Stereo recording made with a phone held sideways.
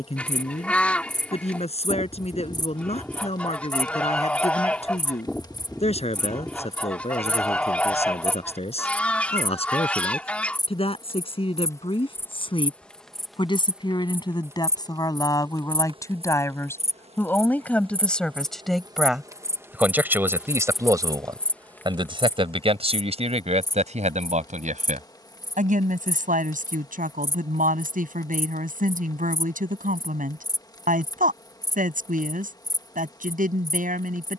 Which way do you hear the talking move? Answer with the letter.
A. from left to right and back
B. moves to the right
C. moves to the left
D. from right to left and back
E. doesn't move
B.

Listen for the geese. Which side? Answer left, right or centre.
centre.